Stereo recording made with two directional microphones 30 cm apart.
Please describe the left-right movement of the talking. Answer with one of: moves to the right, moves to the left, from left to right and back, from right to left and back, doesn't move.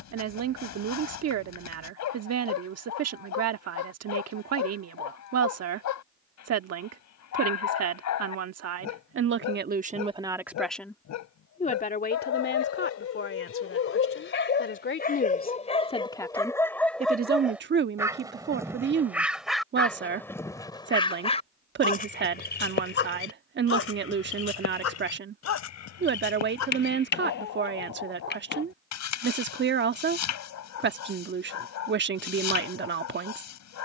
from right to left and back.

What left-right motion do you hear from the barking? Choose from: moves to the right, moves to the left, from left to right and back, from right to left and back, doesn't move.
from left to right and back.